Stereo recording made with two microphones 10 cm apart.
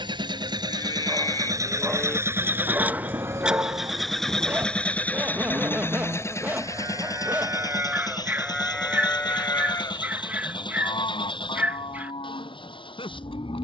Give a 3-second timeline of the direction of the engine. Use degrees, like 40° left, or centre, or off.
30° right, 10° left, 40° left, 50° left, 60° left.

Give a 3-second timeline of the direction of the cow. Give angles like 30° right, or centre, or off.
30° left, 40° right, 20° right, 50° left, 70° left.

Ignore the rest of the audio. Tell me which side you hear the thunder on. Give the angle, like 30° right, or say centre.
30° right.